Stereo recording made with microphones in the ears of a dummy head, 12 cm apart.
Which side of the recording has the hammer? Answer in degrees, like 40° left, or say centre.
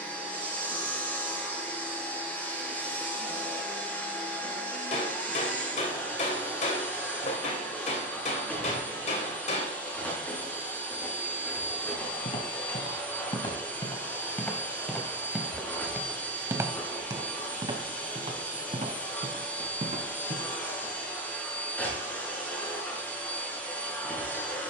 50° left.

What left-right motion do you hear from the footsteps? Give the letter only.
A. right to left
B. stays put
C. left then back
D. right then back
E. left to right
E.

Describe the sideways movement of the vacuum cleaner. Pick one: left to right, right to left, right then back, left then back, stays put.
stays put.